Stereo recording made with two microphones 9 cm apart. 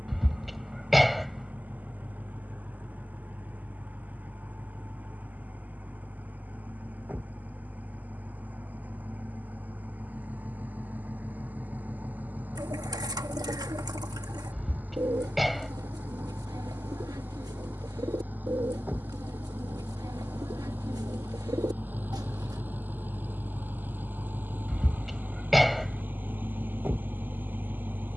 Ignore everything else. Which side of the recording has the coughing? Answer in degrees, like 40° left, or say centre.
centre.